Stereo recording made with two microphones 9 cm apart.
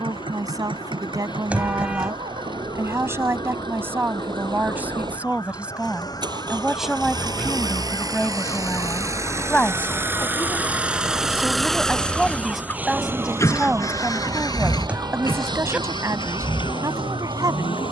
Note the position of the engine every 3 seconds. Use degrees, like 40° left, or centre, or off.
70° right, 60° right, 50° right, 20° right, 30° left, 60° left.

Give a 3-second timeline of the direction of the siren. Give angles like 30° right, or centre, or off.
60° left, 50° left, 40° left, 20° left, 30° right, 60° right.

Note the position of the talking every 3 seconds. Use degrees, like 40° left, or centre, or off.
40° right, 20° right, centre, 10° left, 10° right, 40° right.